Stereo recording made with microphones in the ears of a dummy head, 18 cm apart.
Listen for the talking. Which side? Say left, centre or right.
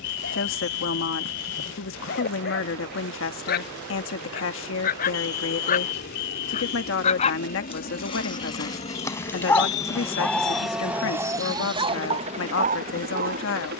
left.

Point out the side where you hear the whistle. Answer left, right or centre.
left.